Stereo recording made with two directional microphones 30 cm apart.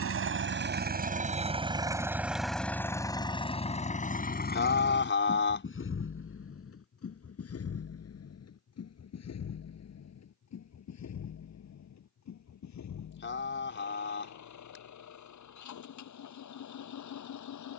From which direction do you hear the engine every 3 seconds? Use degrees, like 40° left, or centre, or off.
20° right, 30° left, 50° left, 60° left, 60° left, 60° left.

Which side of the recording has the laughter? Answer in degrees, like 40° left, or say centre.
40° left.